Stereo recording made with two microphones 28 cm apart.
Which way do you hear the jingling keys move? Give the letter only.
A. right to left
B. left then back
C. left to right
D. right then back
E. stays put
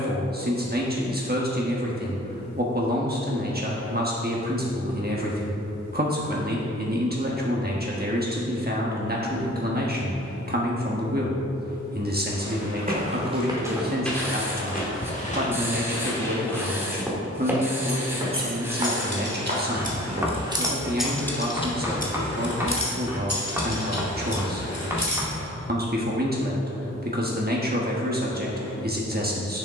A.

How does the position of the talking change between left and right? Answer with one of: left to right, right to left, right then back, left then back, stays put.
stays put.